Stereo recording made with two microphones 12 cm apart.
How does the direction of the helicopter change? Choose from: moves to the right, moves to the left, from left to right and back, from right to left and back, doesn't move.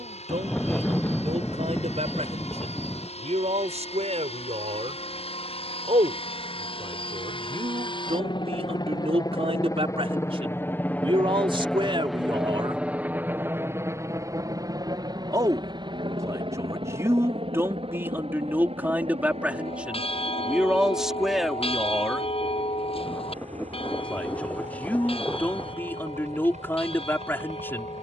moves to the right.